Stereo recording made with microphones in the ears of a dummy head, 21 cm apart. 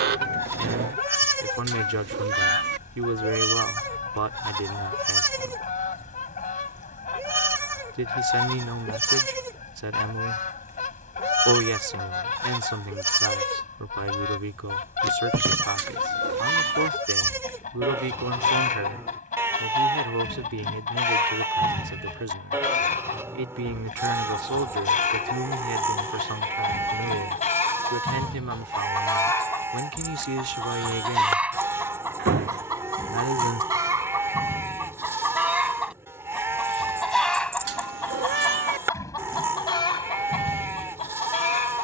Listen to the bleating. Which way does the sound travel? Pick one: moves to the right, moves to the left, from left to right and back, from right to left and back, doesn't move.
doesn't move.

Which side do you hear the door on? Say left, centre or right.
right.